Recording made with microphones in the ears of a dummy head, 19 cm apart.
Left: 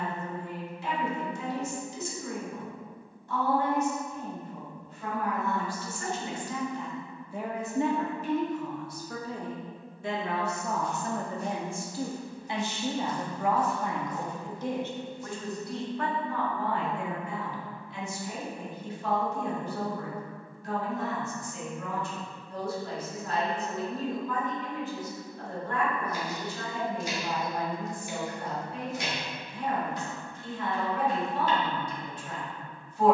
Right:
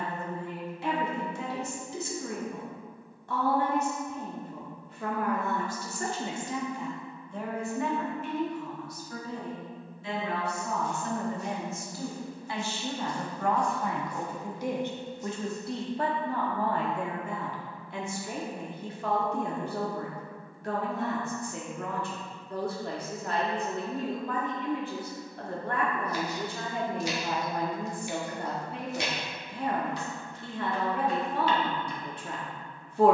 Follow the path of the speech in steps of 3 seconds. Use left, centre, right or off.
right, right, centre, left, centre, right, right, right, right, right, right.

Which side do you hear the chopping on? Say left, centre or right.
right.